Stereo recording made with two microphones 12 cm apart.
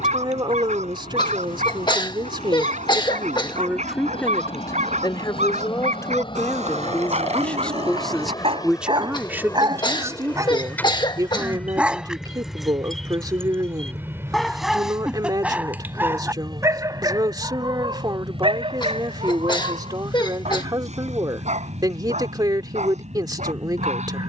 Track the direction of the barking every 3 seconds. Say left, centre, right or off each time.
right, right, right, right, centre, right, right, right.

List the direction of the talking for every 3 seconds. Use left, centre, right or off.
right, centre, centre, right, right, right, right, right.